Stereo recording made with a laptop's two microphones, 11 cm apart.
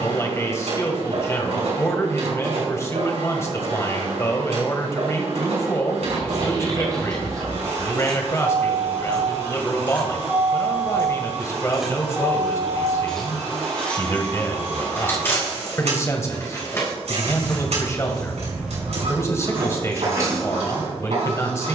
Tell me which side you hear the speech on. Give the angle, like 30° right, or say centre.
30° left.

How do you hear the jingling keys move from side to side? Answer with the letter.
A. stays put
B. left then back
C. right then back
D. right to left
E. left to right
B.